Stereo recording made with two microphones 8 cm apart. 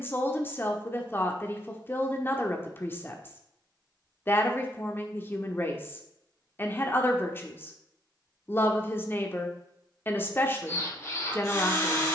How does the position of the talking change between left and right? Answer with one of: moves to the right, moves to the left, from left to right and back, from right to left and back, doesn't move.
doesn't move.